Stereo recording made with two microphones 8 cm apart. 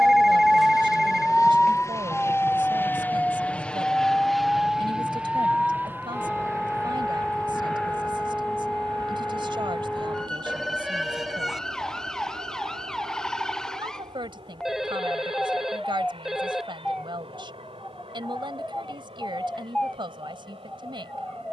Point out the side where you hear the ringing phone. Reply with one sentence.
You can hear the ringing phone in the centre.